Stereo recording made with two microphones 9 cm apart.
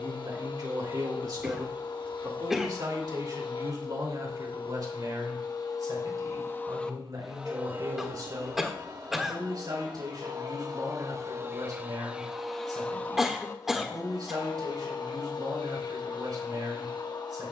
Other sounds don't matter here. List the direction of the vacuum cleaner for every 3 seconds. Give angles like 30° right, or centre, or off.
60° left, 60° left, 10° right, 40° right, 30° left, 60° left.